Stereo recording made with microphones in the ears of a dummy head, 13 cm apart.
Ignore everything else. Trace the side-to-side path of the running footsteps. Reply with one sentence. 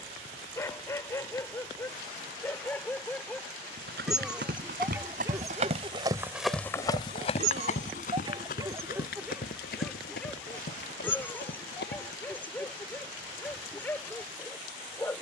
In this clip you hear the running footsteps move to the left.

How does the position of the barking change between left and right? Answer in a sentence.
In this clip you hear the barking move from left to right and back again.